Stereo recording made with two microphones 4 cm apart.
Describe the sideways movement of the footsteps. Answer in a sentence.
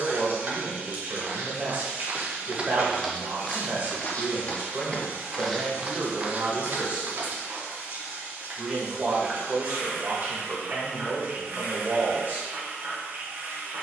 In this clip you hear the footsteps move from right to left and back again.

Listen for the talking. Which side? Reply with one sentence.
In this clip you hear the talking on the right.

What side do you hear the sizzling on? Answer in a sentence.
You can hear the sizzling on the right.